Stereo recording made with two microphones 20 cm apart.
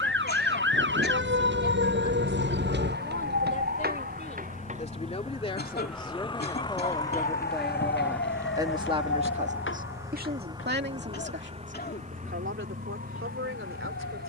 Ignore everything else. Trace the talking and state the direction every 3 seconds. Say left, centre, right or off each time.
left, left, centre, right, right.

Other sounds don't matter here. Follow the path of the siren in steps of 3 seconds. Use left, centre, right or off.
right, right, left, left, left.